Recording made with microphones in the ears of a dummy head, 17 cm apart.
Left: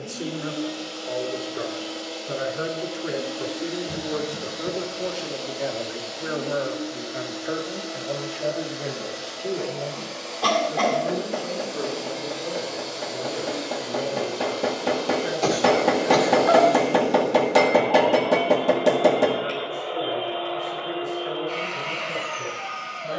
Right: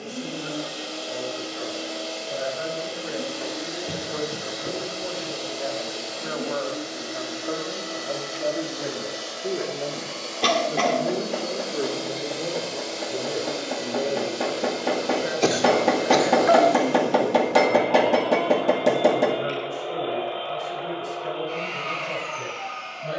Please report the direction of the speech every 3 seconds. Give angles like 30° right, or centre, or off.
60° left, 40° left, 10° left, 20° right, 40° right, 50° right, 50° right, 60° right.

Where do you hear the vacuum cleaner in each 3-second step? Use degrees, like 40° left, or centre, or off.
70° right, 70° right, 70° right, 50° right, 40° right, 20° right, centre, 10° left.